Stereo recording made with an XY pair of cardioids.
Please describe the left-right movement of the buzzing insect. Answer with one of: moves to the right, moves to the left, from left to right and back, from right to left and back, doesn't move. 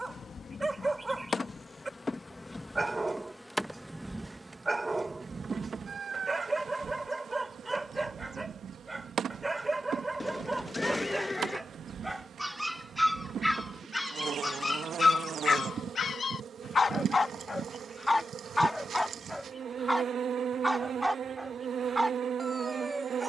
moves to the right.